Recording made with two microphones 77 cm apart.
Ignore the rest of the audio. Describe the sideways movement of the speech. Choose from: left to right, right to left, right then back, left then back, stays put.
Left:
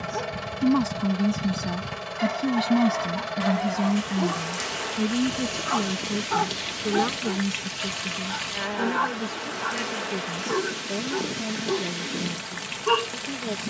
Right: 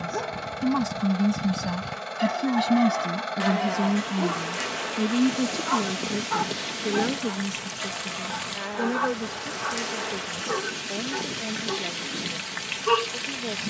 right to left.